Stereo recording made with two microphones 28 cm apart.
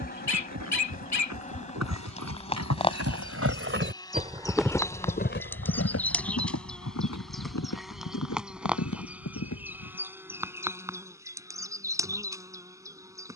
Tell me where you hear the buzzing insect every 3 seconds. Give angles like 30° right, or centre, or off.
30° left, 10° left, centre, 10° right, 10° right.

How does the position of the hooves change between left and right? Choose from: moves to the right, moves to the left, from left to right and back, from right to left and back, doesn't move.
moves to the left.